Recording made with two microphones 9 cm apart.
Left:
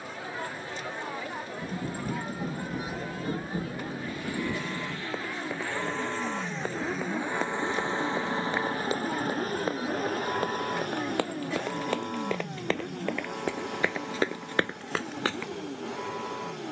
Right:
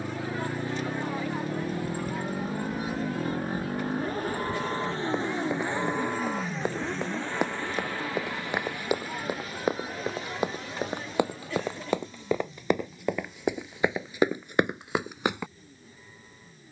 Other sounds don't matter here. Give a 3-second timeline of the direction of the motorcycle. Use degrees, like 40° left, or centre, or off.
60° right, 40° right, 10° left, 50° left, 60° left, 70° left.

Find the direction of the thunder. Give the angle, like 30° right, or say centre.
30° left.